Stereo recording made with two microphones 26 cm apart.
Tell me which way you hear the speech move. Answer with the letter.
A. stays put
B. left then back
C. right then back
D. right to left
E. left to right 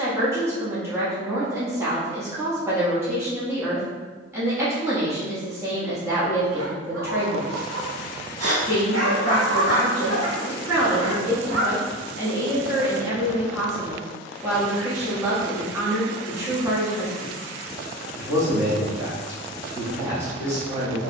A.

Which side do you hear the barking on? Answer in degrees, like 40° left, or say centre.
70° right.